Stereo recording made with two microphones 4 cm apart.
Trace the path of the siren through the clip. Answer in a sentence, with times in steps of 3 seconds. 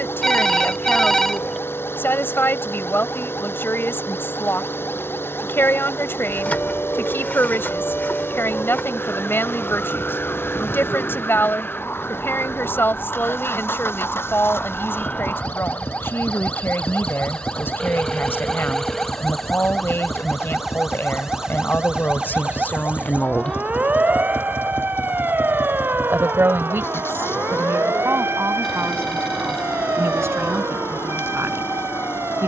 You can hear the siren on the left from 0 s, in the centre from 18 s and on the right from 21 s.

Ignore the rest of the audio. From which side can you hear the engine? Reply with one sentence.
You can hear the engine on the left.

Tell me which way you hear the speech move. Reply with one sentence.
You can hear the speech move to the right.